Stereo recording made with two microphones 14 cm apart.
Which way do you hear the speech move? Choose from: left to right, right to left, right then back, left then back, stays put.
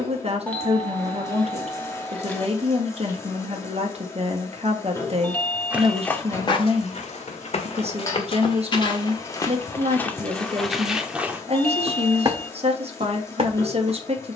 stays put.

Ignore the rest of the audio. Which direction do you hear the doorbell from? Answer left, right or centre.
centre.